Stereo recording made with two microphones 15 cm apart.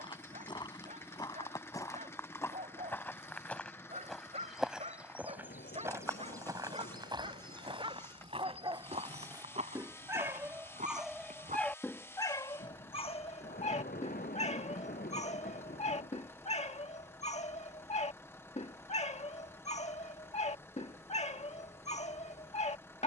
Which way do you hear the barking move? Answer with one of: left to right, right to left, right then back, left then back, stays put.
right to left.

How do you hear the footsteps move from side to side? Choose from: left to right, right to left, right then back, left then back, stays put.
left to right.